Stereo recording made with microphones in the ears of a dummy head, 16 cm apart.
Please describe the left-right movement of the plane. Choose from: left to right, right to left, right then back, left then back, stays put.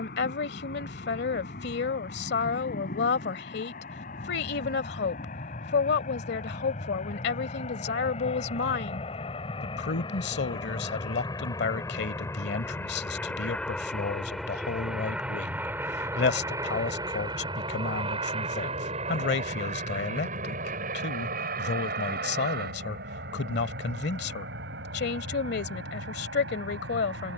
left to right.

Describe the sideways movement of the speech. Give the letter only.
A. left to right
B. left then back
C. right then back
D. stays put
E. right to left
D.